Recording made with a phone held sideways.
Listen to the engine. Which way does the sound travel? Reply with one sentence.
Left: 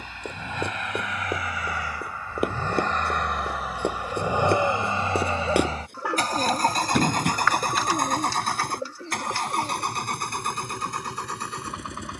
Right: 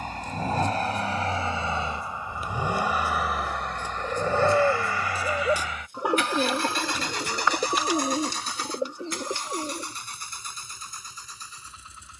In this clip you hear the engine go from the right side to the left.